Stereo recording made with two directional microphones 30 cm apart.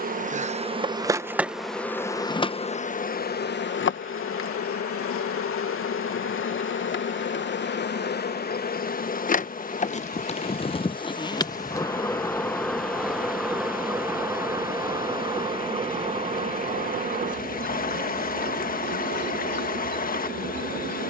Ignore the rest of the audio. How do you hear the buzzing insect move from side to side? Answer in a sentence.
In this clip you hear the buzzing insect go left and come back.